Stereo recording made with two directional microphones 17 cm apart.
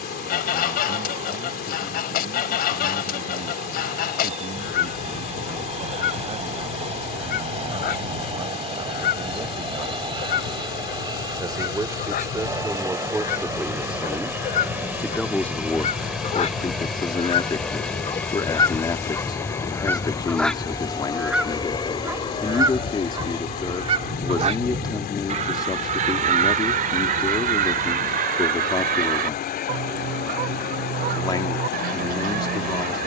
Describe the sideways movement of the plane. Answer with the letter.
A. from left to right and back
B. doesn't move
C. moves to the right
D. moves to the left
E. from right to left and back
D.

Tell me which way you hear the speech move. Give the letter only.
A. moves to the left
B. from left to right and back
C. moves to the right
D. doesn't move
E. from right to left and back
A.